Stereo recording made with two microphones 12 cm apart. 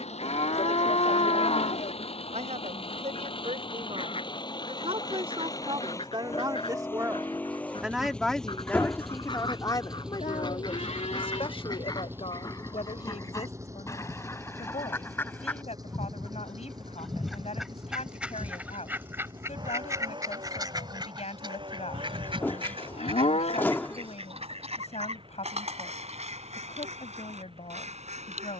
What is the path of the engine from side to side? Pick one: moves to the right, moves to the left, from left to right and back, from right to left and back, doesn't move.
moves to the right.